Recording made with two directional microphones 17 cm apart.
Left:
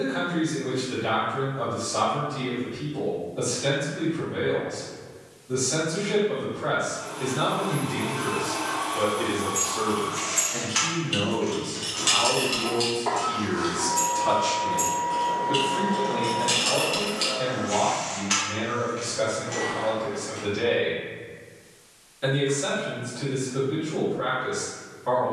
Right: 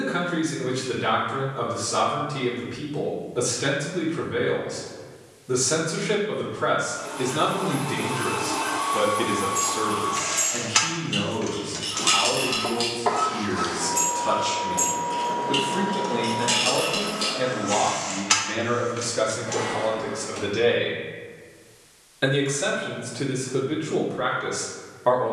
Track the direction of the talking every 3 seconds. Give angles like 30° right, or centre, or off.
70° right, 70° right, 60° right, 10° right, 10° left, 30° right, 60° right, 60° right, 60° right.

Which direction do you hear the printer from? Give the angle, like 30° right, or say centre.
30° right.